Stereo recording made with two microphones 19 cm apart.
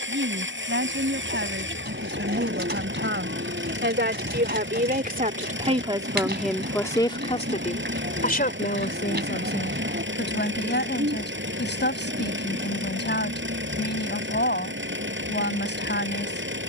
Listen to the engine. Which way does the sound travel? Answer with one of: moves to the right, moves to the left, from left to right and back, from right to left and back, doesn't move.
doesn't move.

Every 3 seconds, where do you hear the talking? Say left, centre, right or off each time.
right, right, left, left, left, left.